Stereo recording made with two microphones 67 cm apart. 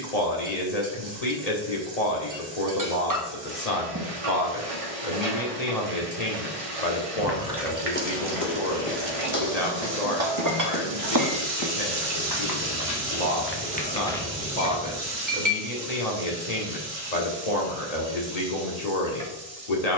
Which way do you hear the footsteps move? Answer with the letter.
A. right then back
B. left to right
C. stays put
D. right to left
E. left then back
E.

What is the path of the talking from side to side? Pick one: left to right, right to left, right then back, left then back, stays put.
stays put.